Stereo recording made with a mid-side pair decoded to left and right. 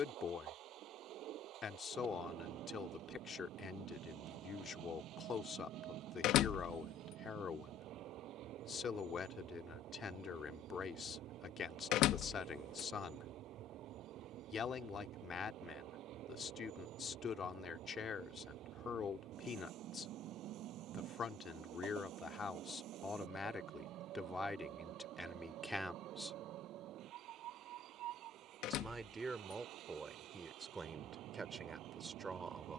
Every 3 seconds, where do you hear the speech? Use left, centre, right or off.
left, left, left, left, left, left, left, left, centre, right, right.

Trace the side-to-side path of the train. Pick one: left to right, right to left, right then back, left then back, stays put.
stays put.